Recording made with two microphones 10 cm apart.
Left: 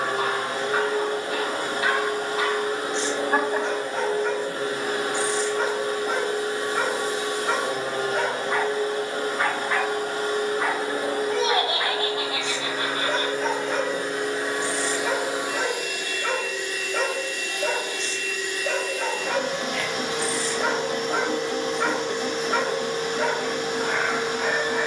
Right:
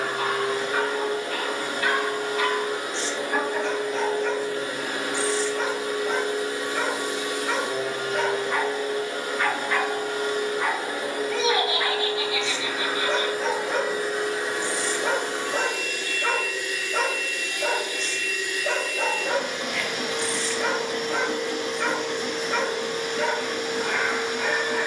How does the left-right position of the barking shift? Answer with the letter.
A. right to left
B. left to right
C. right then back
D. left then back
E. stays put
C.